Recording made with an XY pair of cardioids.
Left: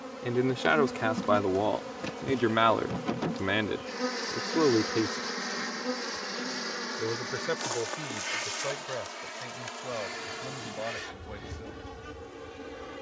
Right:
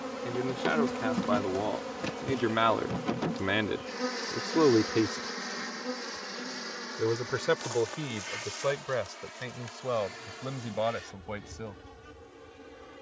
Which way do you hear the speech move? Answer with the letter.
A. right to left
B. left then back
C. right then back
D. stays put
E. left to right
E.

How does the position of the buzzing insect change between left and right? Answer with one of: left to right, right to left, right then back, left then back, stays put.
right to left.